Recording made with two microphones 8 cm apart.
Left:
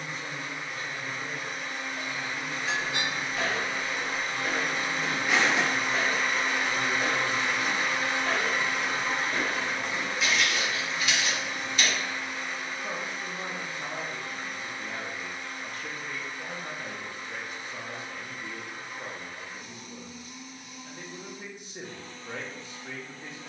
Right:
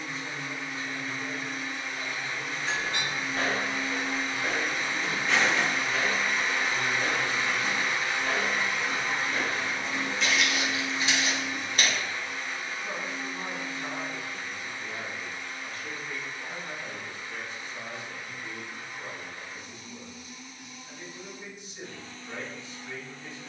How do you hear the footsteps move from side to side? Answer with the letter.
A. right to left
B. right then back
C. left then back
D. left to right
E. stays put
C.